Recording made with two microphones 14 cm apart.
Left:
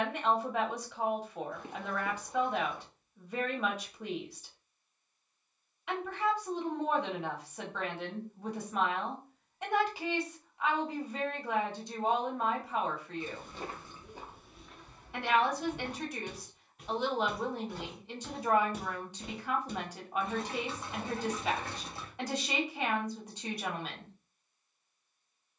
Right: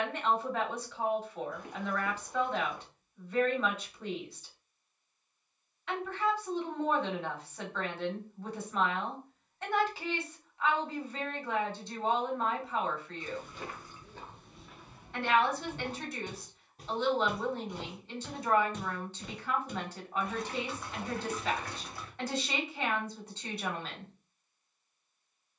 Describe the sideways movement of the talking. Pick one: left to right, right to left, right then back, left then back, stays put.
stays put.